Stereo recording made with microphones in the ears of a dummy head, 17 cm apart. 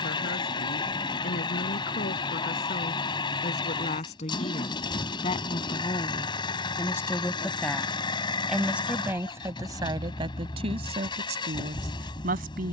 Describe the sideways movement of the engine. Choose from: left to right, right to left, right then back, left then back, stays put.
stays put.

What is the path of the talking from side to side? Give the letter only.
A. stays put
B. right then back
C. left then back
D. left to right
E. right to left
D.